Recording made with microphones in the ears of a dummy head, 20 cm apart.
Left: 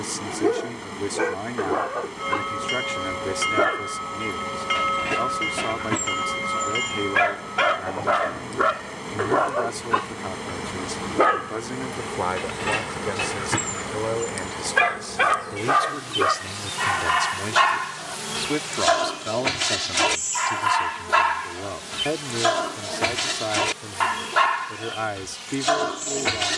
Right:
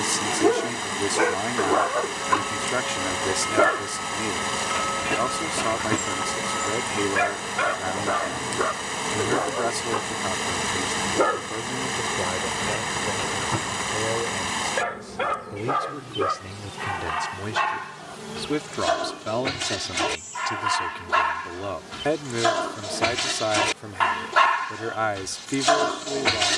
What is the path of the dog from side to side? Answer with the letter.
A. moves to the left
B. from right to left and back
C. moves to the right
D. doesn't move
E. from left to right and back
B.